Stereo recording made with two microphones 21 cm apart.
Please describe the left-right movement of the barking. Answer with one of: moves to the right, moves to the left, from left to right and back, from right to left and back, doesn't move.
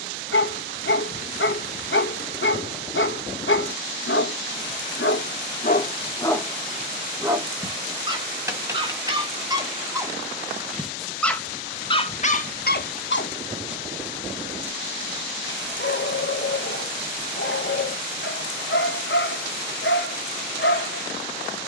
from left to right and back.